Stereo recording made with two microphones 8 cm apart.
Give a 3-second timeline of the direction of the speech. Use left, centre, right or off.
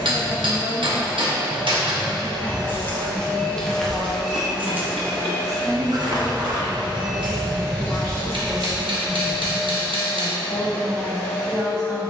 right, centre, right, right.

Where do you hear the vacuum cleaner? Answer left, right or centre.
centre.